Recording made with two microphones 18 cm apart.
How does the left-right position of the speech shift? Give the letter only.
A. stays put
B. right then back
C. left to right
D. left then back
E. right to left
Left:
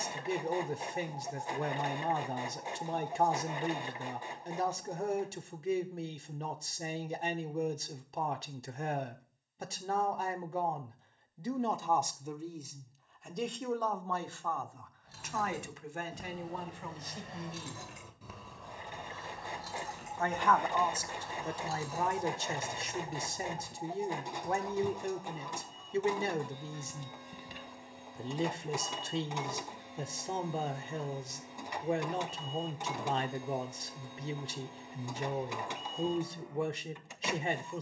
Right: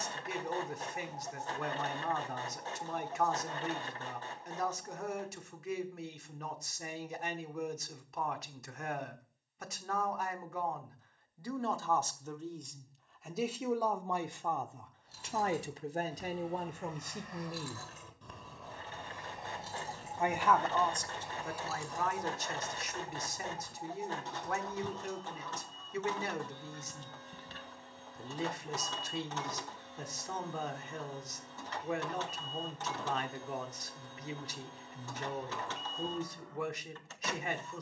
B.